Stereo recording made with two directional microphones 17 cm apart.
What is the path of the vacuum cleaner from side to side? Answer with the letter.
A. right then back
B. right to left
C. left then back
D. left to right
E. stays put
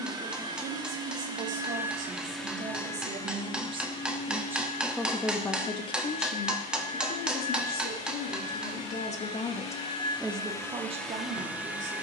C.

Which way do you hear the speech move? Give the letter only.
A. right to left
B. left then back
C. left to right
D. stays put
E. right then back
B.